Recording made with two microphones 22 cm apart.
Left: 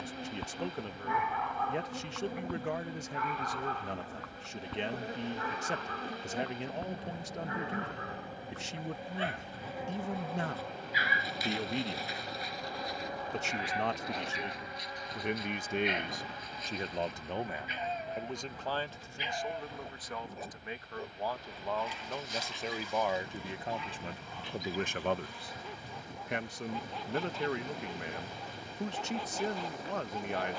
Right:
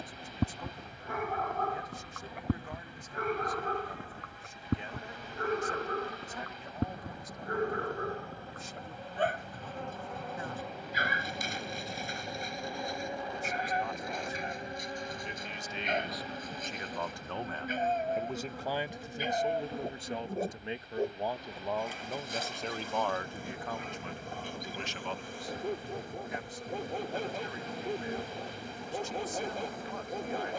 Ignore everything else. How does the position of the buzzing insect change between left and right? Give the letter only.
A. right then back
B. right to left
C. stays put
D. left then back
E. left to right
E.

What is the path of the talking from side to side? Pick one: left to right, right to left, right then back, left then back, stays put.
right then back.